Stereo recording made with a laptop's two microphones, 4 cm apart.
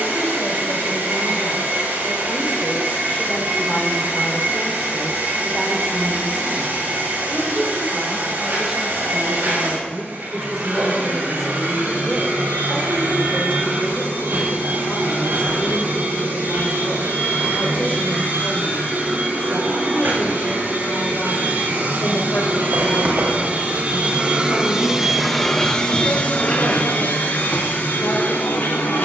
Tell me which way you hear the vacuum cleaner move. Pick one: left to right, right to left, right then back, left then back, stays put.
right to left.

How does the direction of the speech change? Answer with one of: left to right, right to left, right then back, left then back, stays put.
right then back.